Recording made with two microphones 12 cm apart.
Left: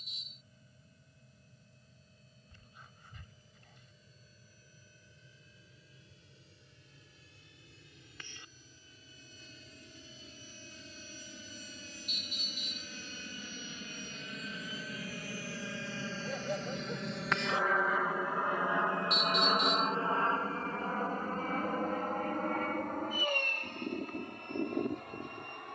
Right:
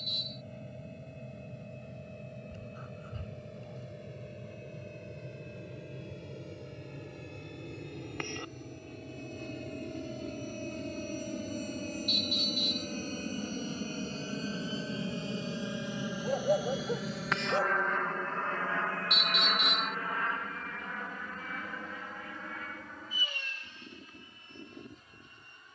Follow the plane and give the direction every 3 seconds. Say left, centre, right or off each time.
right, right, right, right, right, centre, left, left, left.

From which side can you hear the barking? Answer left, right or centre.
right.